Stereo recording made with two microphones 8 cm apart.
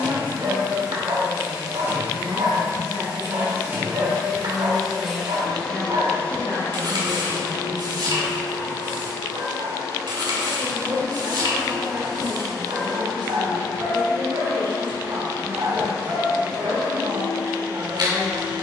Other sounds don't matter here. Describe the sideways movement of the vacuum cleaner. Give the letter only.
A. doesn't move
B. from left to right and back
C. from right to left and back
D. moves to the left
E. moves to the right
C.